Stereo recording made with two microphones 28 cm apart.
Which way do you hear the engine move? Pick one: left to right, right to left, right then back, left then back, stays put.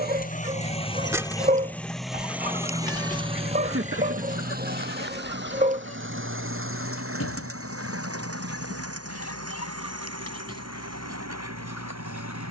left to right.